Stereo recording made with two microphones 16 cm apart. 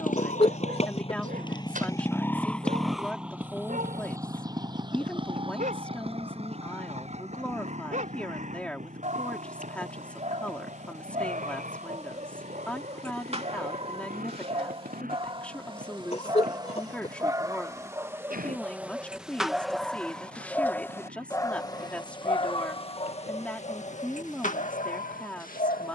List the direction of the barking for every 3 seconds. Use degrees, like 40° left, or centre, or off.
60° right, 60° right, 50° right, 50° right, 40° right, 30° right, centre, 30° left, 60° left.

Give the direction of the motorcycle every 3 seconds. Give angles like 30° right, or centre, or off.
30° left, 20° right, 40° right, 50° right, 60° right, 60° right, 60° right, 60° right, 60° right.